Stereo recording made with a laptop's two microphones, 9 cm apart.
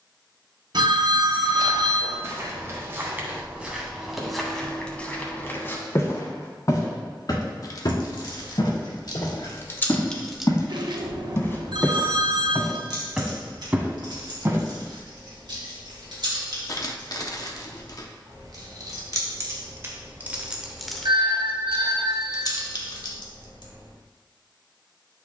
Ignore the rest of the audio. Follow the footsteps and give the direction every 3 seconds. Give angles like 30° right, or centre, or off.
40° right, centre, 50° left, 40° left, 10° right, off, off, off, off.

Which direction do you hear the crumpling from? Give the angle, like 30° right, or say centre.
50° left.